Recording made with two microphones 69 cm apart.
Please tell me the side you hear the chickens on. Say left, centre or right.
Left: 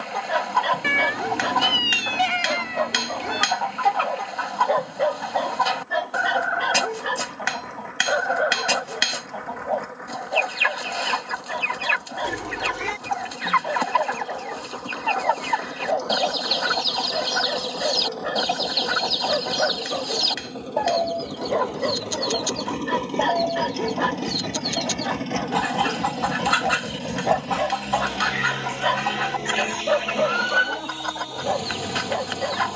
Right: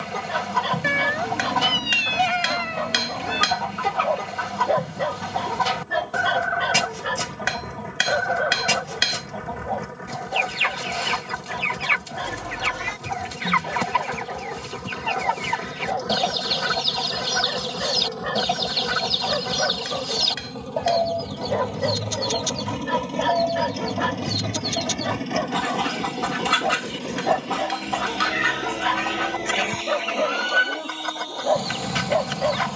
right.